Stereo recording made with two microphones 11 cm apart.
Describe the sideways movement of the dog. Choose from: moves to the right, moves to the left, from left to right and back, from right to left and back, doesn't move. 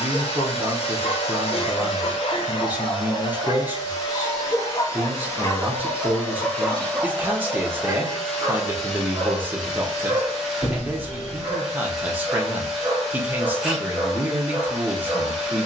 moves to the right.